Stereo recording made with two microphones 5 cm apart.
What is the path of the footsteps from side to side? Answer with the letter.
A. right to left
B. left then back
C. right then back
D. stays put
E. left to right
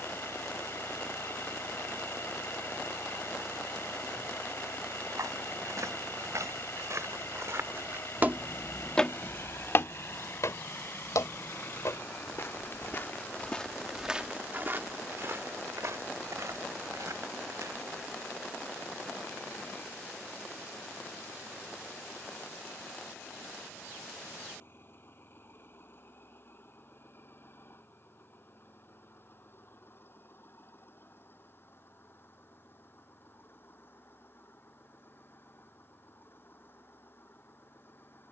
B.